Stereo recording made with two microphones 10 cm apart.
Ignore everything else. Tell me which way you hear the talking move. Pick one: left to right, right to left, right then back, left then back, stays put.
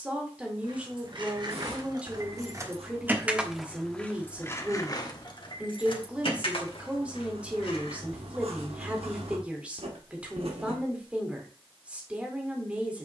stays put.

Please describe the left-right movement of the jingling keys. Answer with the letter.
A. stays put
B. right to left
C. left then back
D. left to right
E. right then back
B.